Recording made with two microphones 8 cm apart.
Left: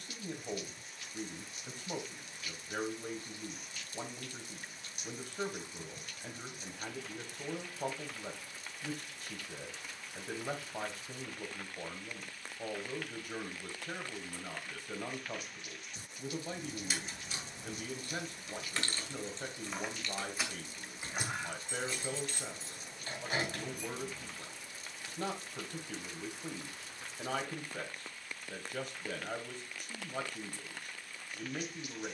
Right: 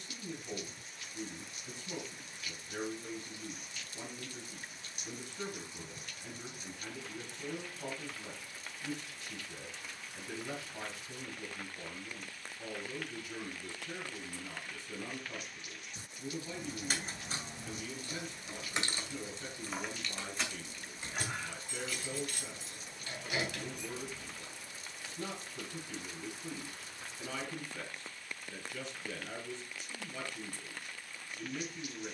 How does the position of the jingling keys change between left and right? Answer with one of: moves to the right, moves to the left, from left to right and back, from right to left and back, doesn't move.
moves to the left.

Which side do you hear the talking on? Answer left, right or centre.
left.